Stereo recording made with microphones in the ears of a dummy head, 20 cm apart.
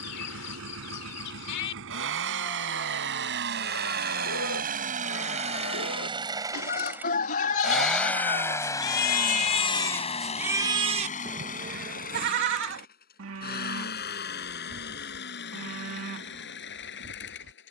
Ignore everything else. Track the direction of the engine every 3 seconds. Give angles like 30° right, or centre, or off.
70° right, 40° right, centre, 30° left, 50° left, 60° left.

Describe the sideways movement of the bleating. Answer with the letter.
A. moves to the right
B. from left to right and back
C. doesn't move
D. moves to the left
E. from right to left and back
A.